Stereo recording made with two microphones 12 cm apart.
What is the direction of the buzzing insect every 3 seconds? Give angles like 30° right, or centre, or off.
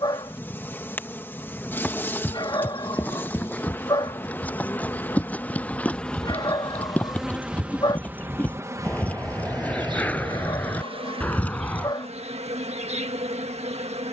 20° left, 20° left, 10° right, 40° right, 60° right.